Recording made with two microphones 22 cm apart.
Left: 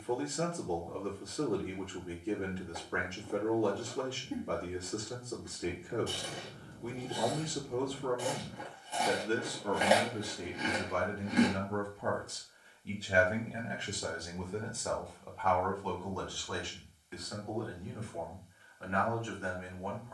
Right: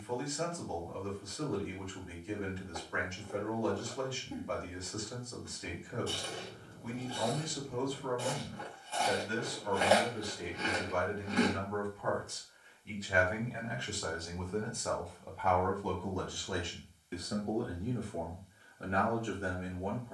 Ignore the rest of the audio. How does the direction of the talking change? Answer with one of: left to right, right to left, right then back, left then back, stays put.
left to right.